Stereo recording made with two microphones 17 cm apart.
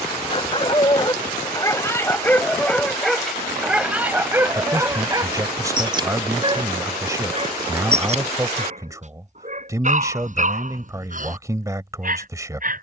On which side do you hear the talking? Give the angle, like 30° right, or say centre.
20° right.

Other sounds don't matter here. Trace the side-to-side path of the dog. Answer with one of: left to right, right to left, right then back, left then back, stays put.
left to right.